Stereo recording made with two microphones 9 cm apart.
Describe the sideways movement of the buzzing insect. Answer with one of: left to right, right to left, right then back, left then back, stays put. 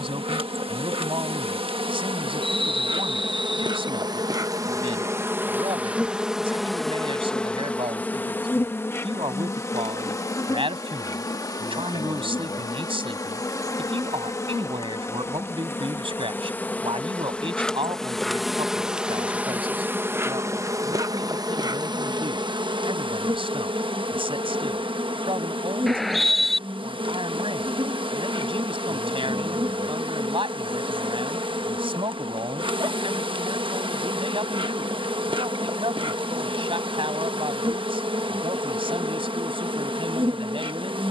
left then back.